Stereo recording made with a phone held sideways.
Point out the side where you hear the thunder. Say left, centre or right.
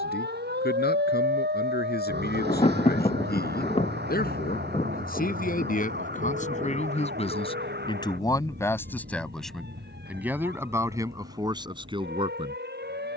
left.